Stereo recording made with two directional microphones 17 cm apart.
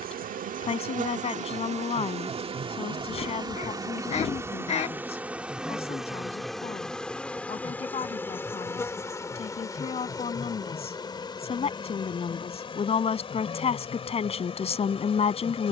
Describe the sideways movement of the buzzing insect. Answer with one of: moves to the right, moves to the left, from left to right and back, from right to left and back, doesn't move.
moves to the left.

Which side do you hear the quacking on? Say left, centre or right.
left.